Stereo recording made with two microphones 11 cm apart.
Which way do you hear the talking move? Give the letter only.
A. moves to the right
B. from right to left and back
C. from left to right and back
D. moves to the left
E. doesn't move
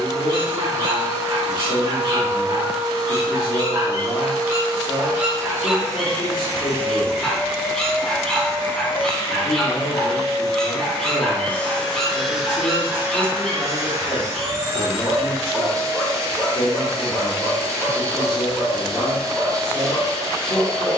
E.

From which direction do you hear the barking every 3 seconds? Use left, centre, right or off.
right, right, centre, centre, centre, centre, centre.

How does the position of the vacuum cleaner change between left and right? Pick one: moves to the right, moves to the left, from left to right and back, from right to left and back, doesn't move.
from right to left and back.